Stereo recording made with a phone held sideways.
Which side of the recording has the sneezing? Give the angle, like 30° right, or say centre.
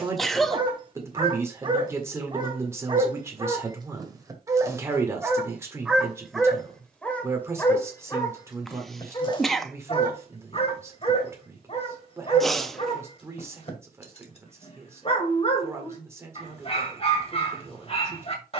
centre.